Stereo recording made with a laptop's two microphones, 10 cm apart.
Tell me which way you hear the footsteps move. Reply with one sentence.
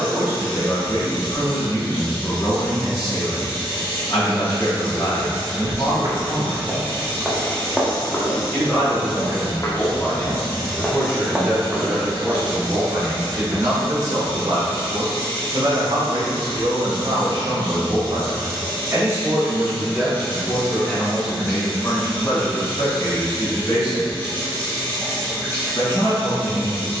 You can hear the footsteps move from right to left and back again.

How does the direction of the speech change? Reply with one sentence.
You can hear the speech move from left to right and back again.